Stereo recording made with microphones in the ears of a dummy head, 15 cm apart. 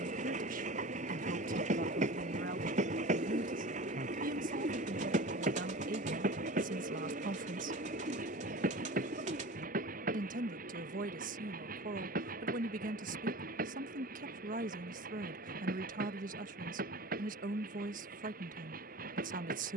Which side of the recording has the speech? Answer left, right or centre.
right.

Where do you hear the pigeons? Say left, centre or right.
right.